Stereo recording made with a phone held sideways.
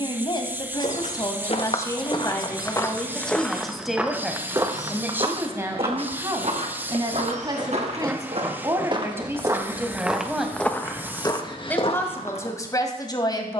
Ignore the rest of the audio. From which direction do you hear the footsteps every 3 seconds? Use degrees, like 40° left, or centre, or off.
40° left, 20° right, 50° right, 10° left, 50° left.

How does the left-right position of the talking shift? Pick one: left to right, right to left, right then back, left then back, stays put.
right then back.